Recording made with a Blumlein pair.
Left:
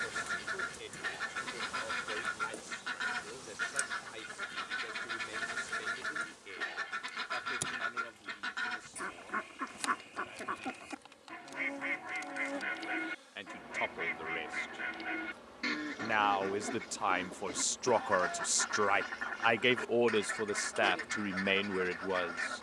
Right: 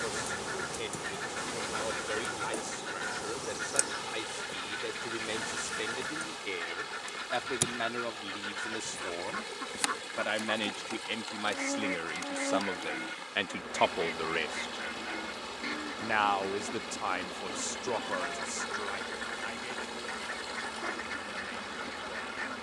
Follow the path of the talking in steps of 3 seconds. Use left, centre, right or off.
right, right, right, right, right, centre, left, left.